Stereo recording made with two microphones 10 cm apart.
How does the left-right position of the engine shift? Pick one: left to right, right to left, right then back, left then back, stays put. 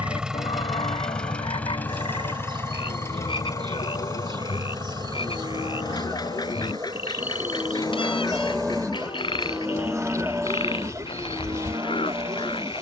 right to left.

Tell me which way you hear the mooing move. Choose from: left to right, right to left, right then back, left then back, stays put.
left to right.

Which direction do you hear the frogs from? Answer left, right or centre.
left.